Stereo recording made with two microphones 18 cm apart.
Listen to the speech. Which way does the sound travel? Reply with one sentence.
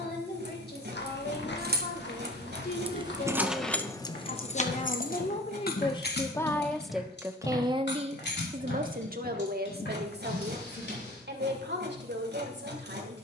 In this clip you hear the speech move from left to right.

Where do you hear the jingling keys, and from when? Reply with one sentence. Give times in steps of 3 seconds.
You can hear the jingling keys on the right from 0 s, on the left from 3 s and not at all from 12 s.